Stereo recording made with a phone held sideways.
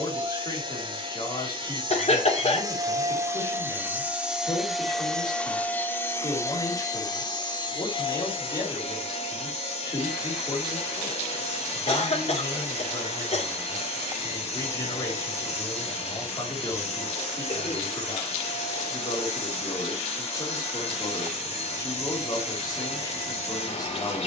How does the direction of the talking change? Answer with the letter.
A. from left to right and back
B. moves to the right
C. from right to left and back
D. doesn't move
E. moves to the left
D.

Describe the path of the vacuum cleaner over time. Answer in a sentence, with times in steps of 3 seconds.
In this clip you hear the vacuum cleaner on the right from 0 s, in the centre from 3 s and on the left from 6 s.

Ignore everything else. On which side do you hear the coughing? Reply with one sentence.
In this clip you hear the coughing on the left.